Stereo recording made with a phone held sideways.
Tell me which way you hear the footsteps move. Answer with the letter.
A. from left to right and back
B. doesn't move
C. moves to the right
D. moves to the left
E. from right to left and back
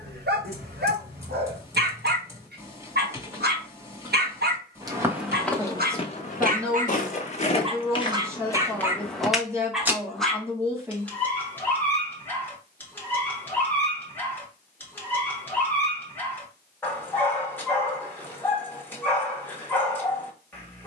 E.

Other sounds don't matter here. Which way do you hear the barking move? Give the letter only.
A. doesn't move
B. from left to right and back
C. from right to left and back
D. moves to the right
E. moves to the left
E.